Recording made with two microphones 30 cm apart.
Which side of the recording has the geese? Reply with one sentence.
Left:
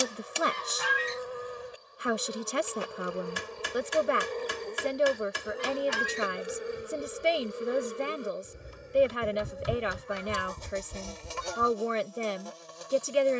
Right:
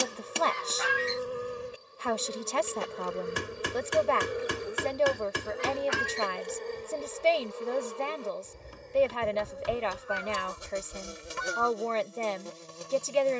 You can hear the geese on the left.